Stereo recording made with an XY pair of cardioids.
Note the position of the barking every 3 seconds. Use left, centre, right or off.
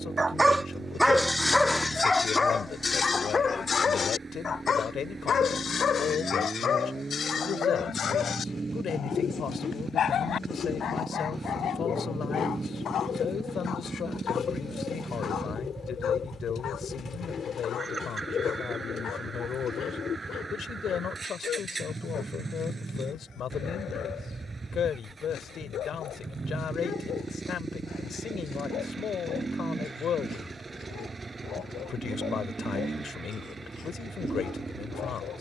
centre, left, left, left, left, left, left, left, left, left, left, left.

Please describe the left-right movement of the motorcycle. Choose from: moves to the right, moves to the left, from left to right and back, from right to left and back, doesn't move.
doesn't move.